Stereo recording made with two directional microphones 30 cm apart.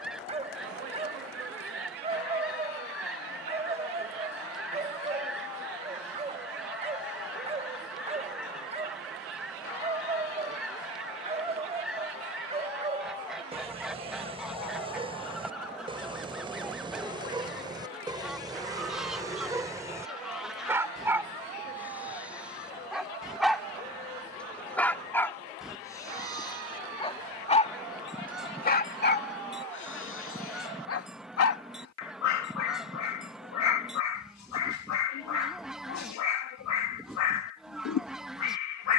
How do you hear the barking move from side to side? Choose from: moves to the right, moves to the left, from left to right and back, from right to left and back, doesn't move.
moves to the left.